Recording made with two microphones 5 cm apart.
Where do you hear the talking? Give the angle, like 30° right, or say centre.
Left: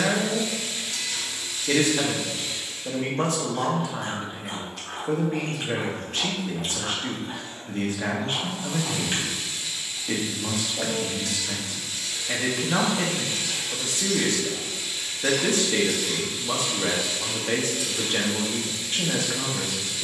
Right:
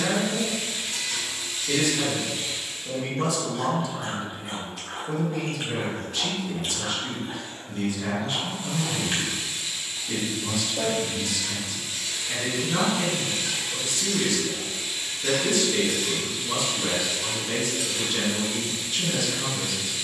50° left.